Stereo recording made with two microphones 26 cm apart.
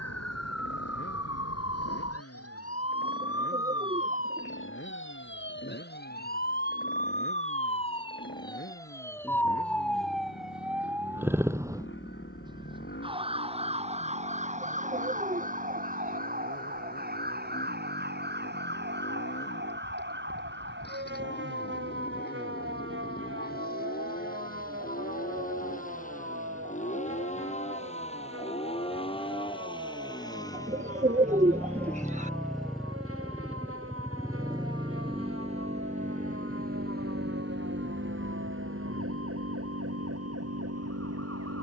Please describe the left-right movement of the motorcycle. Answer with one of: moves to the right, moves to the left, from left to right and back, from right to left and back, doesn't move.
moves to the right.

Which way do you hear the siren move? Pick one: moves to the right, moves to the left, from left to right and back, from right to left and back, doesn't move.
moves to the right.